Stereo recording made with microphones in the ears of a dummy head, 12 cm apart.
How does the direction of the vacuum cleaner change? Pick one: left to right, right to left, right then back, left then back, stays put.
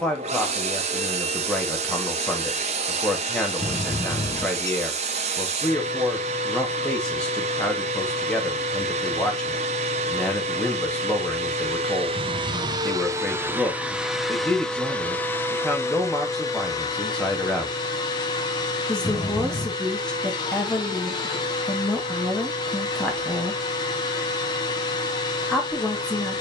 right to left.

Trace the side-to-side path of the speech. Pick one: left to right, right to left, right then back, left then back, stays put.
stays put.